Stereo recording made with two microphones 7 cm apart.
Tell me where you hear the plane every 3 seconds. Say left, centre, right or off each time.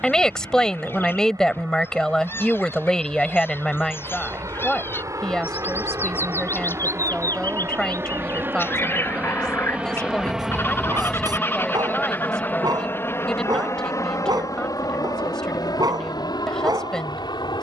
right, right, right, centre, left, left.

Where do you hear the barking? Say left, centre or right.
right.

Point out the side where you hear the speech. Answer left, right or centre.
centre.